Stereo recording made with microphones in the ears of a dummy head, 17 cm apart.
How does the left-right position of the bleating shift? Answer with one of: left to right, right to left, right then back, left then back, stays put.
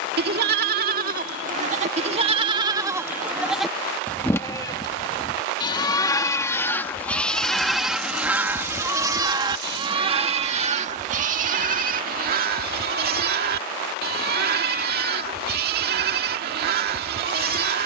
left then back.